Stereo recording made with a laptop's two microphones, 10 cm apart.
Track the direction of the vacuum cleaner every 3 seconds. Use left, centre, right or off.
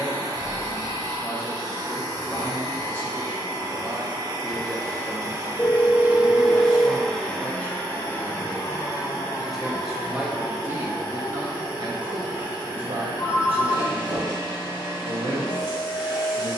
right, right, centre, left, left, left.